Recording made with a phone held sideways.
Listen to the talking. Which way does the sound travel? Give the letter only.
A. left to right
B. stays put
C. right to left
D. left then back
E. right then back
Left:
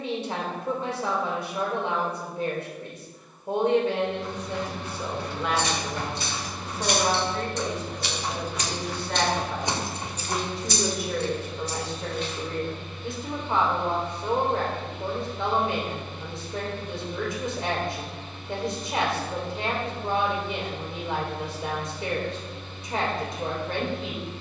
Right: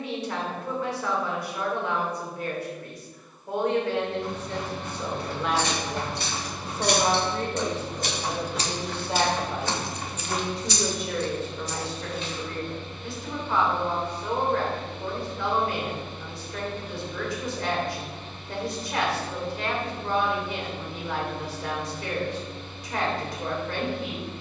E.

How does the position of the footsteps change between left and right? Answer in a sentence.
In this clip you hear the footsteps move from right to left.